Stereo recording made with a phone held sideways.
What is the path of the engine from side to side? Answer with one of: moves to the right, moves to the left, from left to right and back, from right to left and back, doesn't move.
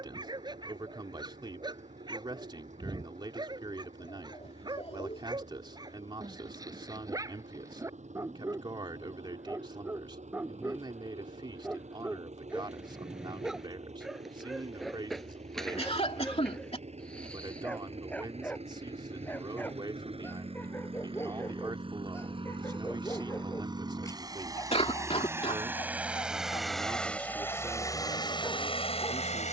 moves to the left.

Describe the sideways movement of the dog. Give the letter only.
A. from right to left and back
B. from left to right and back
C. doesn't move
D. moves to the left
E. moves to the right
D.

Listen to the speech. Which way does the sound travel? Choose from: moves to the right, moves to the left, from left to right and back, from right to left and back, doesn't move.
doesn't move.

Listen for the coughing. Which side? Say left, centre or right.
left.